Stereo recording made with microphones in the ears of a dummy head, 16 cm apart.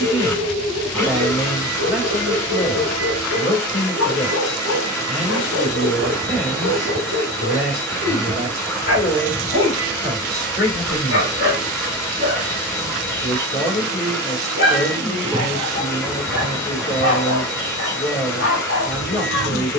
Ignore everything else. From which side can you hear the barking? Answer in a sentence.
In this clip you hear the barking on the left.